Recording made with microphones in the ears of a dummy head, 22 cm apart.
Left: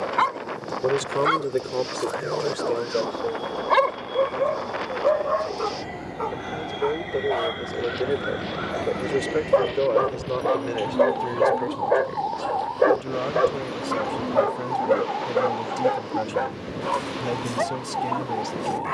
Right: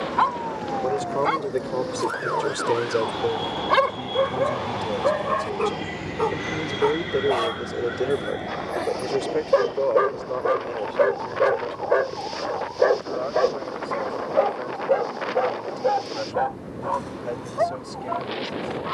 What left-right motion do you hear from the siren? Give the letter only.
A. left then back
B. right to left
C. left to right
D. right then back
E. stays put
B.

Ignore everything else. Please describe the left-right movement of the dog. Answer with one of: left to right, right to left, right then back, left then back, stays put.
right then back.